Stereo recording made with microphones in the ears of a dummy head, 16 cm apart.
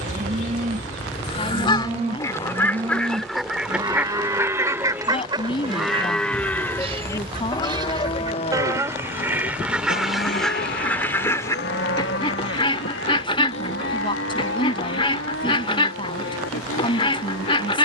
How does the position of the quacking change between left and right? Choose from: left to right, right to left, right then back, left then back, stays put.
right then back.